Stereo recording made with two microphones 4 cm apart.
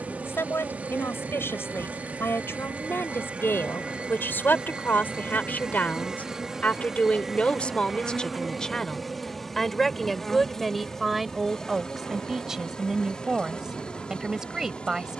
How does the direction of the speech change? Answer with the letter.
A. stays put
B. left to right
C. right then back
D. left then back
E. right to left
B.